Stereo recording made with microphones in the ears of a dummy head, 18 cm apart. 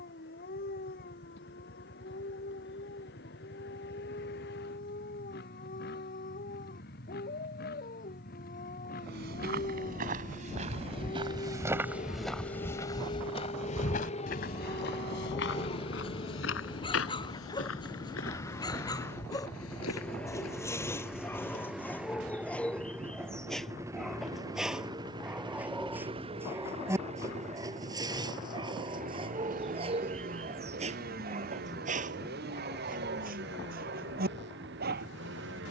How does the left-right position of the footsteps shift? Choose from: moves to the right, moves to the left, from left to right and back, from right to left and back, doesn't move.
moves to the left.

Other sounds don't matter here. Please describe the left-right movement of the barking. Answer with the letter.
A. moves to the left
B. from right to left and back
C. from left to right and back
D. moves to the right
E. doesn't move
D.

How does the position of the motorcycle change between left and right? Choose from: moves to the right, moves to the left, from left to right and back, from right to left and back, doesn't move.
moves to the right.